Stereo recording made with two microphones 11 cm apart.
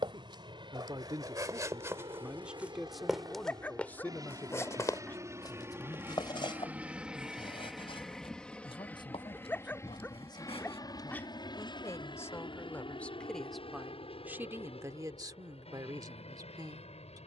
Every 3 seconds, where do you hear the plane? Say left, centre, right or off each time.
right, right, centre, left, left, left.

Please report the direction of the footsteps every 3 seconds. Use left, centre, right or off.
right, left, left, left, off, off.